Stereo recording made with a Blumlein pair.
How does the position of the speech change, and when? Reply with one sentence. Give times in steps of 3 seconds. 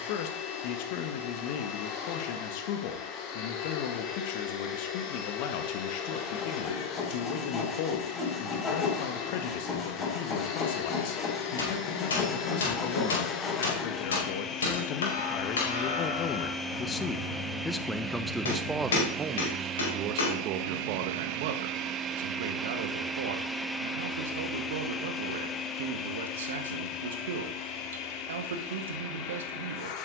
In this clip you hear the speech on the left from 0 s and on the right from 18 s.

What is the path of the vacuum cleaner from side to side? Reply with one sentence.
In this clip you hear the vacuum cleaner go right and come back.